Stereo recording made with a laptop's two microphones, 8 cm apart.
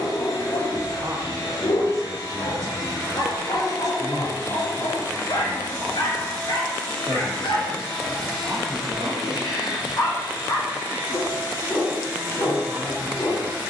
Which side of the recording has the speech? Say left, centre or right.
right.